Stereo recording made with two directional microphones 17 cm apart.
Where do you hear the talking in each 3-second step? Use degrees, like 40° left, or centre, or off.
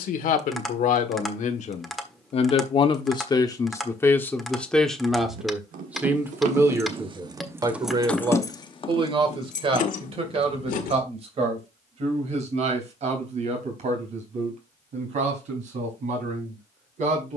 50° left, 10° left, 20° right, 40° right, 50° right, 50° right.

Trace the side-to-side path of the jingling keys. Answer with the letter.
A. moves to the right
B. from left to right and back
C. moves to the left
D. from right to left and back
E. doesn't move
C.